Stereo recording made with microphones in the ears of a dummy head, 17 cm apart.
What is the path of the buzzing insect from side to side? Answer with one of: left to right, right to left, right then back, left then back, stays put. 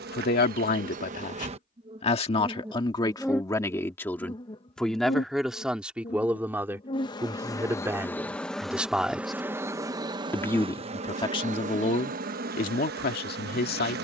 left then back.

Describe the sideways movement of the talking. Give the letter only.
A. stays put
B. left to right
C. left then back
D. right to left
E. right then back
E.